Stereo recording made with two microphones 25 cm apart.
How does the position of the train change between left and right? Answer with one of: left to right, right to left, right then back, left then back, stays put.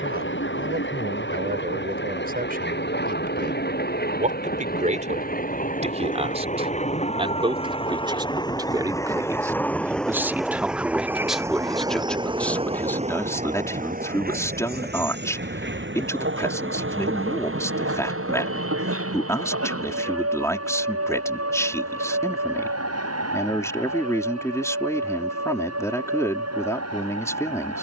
left to right.